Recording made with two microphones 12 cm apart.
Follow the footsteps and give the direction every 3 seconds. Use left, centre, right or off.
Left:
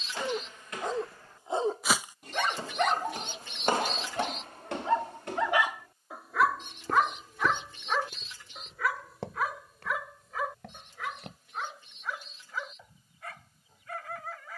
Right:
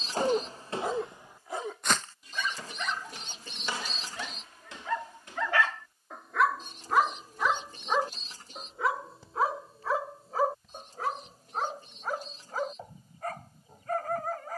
centre, left, left, left, off.